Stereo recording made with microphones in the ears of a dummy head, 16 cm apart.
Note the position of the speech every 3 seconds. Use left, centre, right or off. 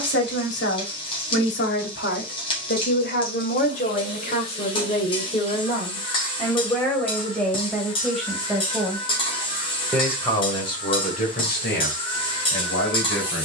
left, left, centre, left, left.